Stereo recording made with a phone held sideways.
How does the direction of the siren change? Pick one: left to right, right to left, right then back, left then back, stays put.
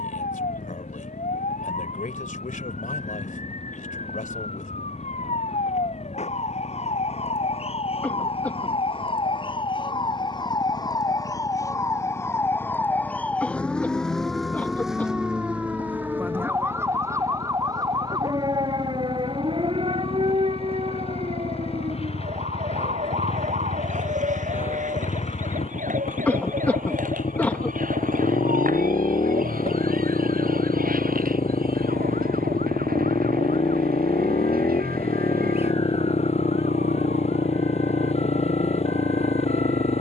left to right.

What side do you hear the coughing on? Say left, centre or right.
centre.